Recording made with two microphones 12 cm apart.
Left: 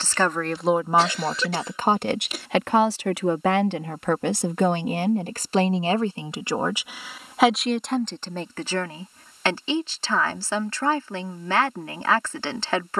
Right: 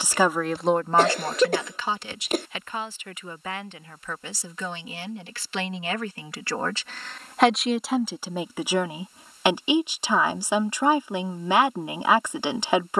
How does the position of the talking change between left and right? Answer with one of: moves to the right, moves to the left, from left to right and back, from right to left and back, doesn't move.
from right to left and back.